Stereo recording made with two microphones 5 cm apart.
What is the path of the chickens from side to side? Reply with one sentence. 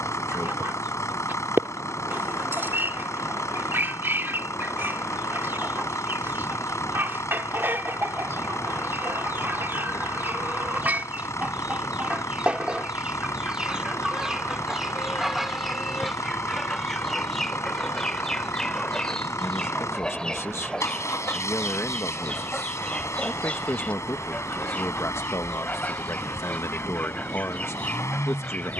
You can hear the chickens travel towards the left.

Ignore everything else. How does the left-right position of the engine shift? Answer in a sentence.
In this clip you hear the engine stay put.